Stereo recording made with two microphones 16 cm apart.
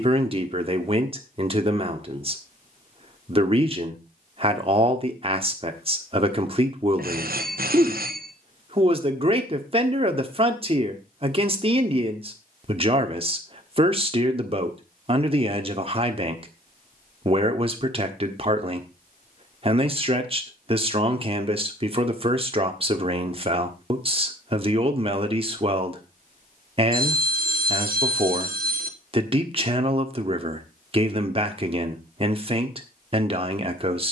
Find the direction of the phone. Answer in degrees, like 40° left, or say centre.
70° right.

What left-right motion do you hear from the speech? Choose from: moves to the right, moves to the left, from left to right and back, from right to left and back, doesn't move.
doesn't move.